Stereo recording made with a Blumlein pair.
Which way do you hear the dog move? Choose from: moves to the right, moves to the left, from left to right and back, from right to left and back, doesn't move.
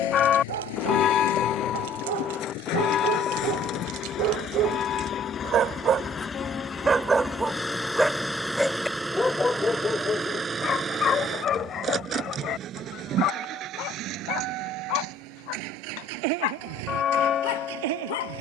moves to the left.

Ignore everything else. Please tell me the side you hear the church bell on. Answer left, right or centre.
left.